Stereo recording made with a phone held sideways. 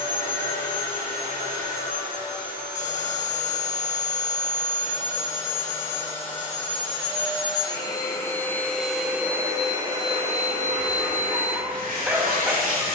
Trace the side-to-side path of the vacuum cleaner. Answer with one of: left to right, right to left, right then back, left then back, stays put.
left to right.